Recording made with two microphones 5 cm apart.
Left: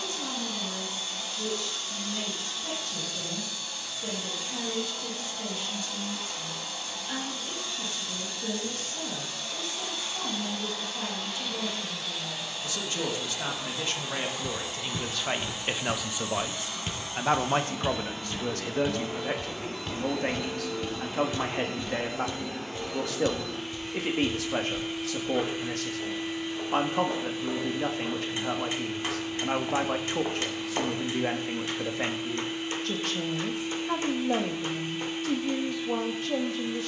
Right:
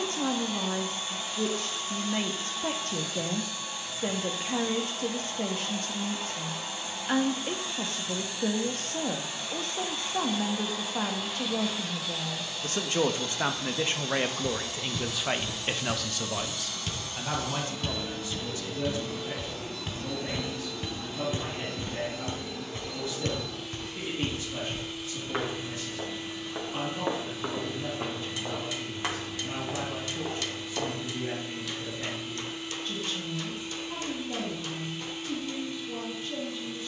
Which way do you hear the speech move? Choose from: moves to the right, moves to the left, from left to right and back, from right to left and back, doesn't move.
moves to the left.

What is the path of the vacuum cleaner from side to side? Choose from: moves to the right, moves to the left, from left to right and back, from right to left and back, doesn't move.
moves to the left.